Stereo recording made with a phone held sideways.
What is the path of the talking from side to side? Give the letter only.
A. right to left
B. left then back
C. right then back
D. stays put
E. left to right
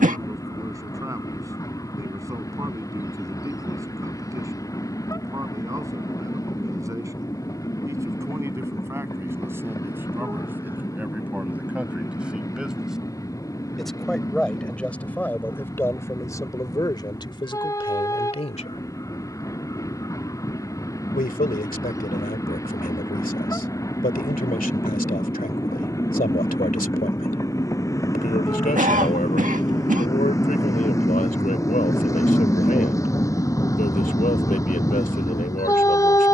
A.